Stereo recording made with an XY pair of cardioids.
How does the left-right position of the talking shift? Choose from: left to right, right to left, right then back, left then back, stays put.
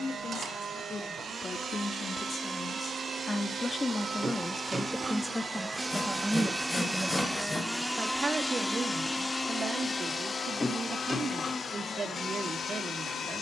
left to right.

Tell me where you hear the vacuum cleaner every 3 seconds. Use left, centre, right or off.
right, right, centre, left, left.